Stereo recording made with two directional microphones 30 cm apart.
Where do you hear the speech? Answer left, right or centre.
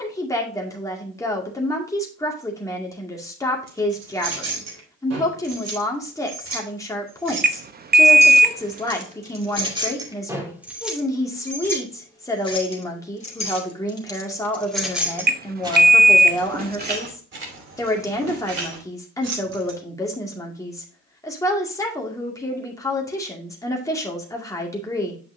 centre.